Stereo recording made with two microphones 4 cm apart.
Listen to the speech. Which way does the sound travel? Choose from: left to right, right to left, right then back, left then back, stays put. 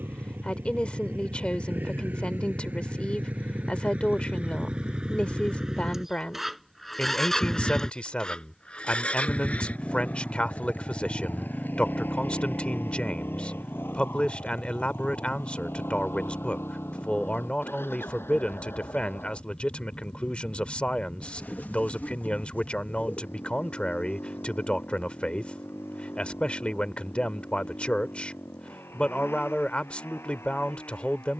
stays put.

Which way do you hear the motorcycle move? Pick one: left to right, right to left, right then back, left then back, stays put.
right to left.